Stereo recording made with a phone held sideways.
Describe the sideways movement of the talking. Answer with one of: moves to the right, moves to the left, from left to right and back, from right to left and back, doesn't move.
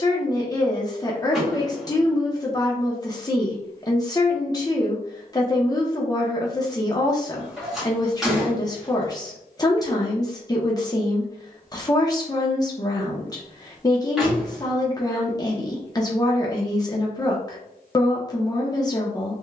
doesn't move.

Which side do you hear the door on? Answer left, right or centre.
centre.